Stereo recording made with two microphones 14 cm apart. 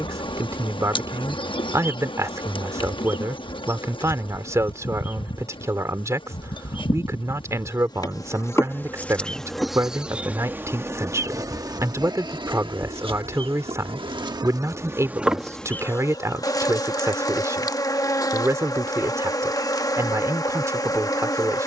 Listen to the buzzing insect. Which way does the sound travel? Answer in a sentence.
You can hear the buzzing insect move from left to right and back again.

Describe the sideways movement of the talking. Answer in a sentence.
You can hear the talking stay put.